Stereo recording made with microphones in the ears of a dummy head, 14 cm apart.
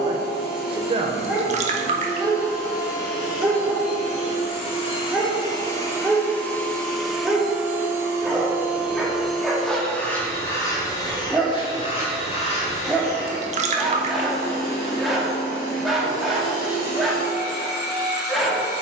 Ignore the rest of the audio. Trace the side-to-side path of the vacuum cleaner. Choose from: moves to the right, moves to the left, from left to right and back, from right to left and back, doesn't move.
from left to right and back.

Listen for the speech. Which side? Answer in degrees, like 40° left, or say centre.
30° right.